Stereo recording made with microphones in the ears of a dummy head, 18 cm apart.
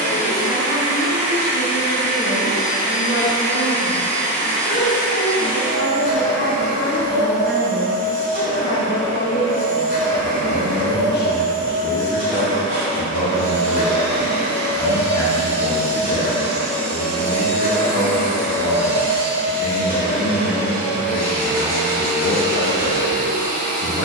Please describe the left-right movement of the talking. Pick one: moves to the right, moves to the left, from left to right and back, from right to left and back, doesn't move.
doesn't move.